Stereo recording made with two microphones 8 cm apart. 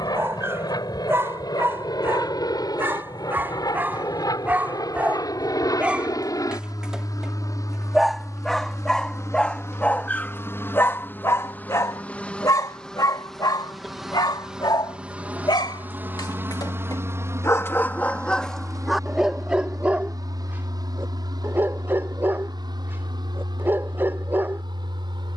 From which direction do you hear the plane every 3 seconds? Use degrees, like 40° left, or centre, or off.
70° left, 60° left, 50° left, 30° left, centre, 30° right, 50° right, 60° right, 60° right.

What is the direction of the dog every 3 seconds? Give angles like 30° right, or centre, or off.
30° right, 20° right, centre, 30° left, 60° left, 50° left, centre, 30° right, 30° right.